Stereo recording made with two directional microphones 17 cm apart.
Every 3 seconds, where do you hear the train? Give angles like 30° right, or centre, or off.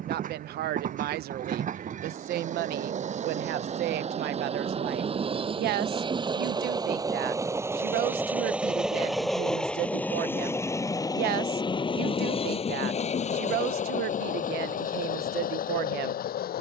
50° right, 40° right, 20° right, 10° left, 40° left, 60° left.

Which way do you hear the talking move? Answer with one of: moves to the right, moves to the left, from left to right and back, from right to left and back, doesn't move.
doesn't move.